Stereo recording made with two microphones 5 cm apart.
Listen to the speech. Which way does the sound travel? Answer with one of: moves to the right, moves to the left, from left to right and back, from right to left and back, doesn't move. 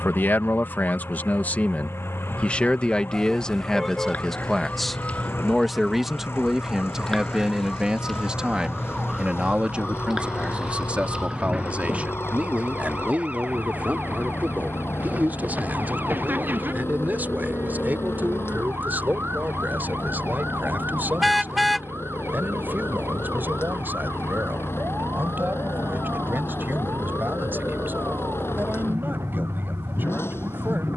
moves to the right.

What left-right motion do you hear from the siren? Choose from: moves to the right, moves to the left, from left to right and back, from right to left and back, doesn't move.
moves to the right.